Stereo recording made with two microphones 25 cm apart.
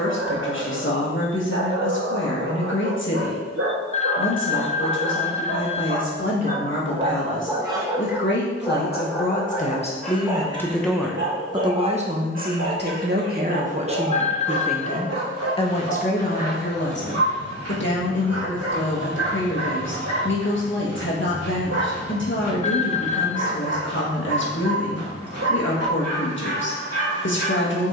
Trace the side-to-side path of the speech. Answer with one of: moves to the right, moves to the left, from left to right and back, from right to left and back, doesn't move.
from left to right and back.